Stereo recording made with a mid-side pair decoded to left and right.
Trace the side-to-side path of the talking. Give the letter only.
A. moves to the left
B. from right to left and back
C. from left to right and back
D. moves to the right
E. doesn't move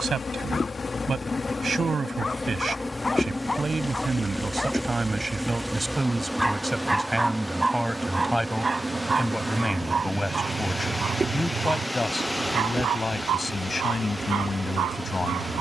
A.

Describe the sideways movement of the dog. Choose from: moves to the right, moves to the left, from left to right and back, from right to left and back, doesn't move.
moves to the right.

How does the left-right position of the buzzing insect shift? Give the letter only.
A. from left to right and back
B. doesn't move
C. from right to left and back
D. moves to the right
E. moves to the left
D.